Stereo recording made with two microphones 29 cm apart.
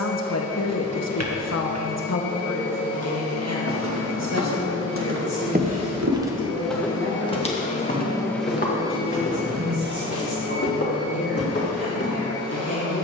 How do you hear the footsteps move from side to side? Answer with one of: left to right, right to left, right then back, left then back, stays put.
right to left.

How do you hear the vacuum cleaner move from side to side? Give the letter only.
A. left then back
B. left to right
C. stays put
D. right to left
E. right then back
B.